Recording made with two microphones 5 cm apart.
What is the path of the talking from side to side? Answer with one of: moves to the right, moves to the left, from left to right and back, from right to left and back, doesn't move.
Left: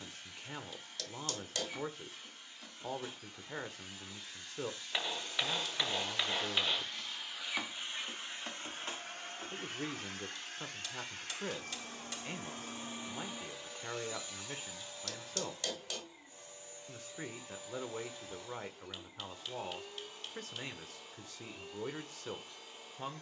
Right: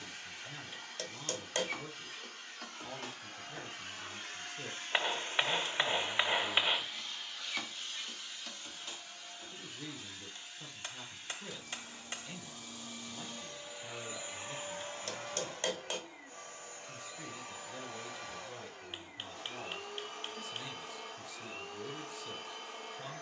doesn't move.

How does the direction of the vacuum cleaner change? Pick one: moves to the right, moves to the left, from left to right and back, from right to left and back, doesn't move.
from right to left and back.